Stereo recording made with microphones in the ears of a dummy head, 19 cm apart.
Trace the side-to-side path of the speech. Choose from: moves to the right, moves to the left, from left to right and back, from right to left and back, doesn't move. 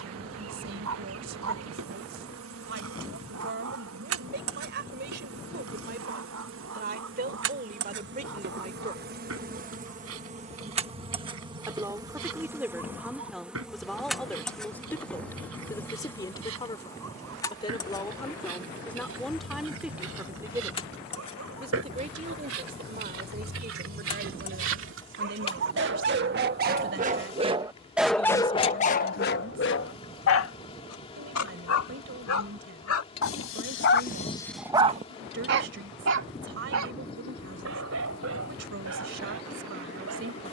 from right to left and back.